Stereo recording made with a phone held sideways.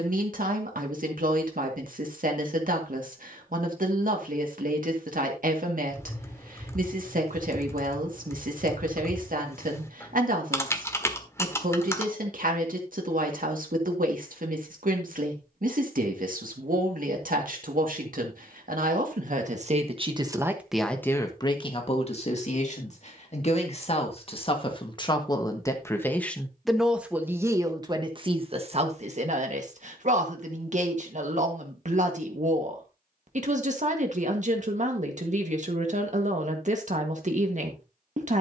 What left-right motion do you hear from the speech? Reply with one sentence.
In this clip you hear the speech go left and come back.